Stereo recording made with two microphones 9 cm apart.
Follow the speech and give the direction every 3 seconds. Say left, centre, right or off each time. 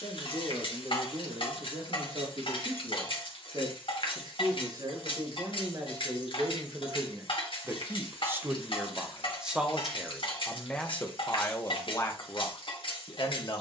right, right, right, centre, left.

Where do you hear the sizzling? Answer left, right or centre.
left.